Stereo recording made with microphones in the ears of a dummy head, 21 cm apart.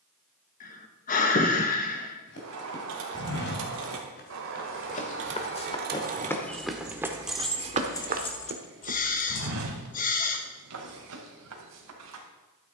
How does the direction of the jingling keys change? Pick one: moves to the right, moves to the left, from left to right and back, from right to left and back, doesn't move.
moves to the left.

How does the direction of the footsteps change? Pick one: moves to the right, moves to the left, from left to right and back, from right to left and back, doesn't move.
moves to the right.